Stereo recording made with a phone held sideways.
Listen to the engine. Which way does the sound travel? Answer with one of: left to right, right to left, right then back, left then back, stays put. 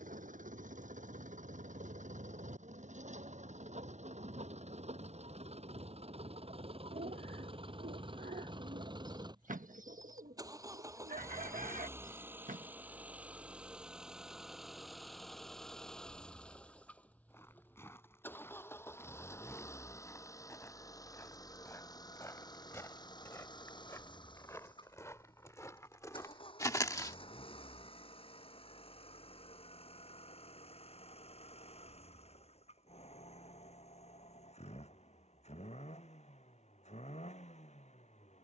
right to left.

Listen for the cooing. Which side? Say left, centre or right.
right.